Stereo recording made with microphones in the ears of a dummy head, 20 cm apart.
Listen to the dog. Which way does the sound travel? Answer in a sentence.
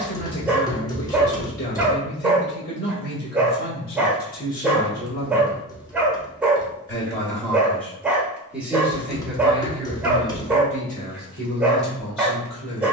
You can hear the dog stay in one place.